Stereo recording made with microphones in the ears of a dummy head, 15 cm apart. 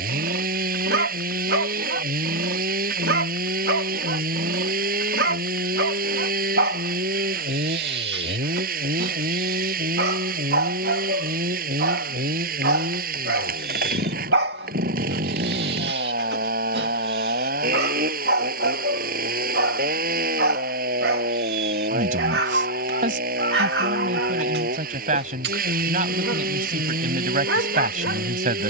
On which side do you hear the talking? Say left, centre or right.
right.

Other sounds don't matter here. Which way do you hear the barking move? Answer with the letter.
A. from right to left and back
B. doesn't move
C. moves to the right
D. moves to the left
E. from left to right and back
B.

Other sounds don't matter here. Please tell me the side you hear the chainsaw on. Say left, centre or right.
right.